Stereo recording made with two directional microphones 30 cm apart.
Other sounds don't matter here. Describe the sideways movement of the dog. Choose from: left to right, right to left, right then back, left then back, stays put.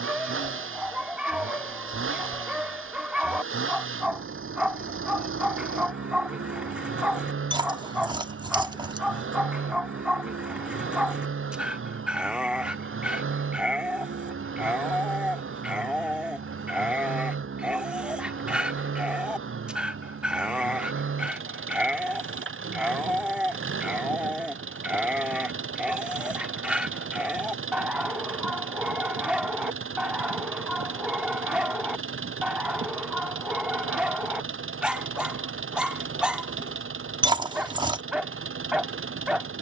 stays put.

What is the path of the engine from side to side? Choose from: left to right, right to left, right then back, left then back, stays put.
stays put.